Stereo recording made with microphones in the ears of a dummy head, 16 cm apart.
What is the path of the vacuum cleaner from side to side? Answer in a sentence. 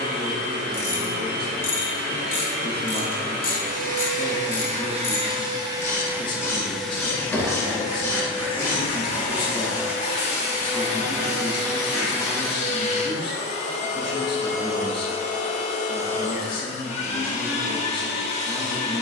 In this clip you hear the vacuum cleaner move to the left.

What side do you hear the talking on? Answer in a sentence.
You can hear the talking on the left.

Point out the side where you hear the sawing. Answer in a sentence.
You can hear the sawing on the right.